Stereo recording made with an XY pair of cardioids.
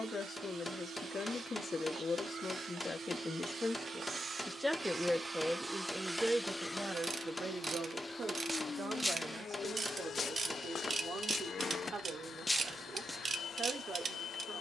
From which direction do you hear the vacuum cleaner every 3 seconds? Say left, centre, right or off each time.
right, right, left, left, left.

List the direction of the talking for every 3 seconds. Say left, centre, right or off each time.
left, centre, right, right, right.